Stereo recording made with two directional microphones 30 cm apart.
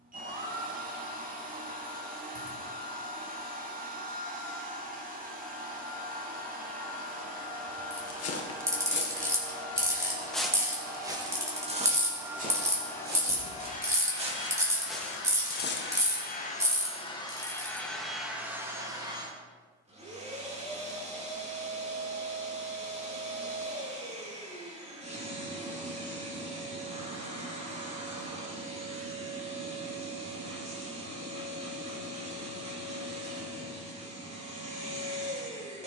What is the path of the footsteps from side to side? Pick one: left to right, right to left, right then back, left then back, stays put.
right then back.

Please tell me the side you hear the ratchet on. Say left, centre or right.
centre.